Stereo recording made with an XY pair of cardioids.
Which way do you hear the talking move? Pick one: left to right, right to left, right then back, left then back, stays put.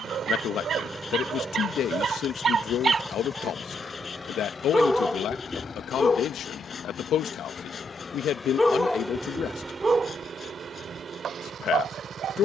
stays put.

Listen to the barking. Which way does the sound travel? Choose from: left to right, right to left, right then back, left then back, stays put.
left then back.